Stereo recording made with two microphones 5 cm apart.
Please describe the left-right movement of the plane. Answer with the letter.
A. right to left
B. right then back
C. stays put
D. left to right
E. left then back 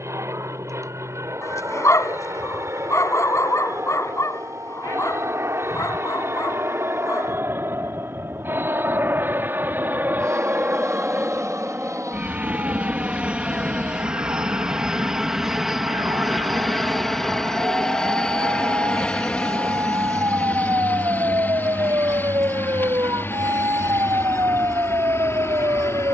A.